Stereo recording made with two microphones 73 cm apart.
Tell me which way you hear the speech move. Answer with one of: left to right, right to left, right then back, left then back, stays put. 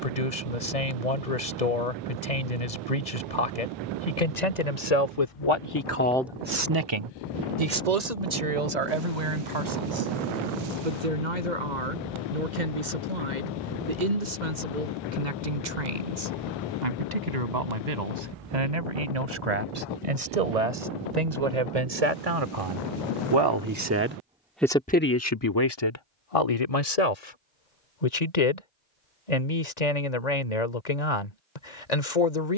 right then back.